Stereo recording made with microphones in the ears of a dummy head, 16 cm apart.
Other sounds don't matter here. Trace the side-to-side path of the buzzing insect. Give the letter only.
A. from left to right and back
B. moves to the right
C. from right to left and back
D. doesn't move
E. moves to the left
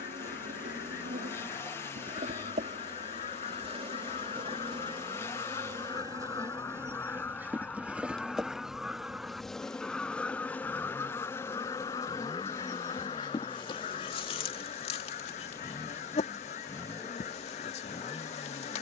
E.